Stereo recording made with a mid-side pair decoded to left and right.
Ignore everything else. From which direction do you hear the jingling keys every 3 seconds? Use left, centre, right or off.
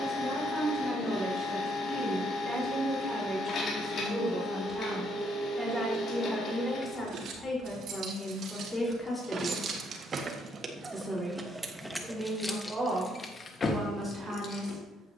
off, off, right, right, left.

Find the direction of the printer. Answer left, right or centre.
left.